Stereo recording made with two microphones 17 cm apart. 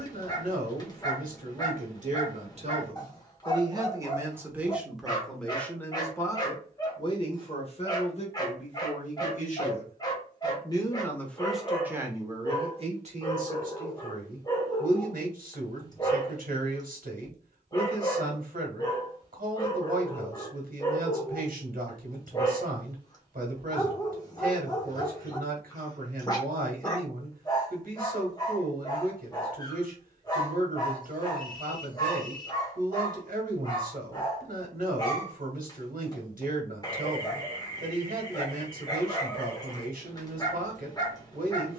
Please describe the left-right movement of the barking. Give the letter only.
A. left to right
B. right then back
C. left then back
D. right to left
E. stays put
E.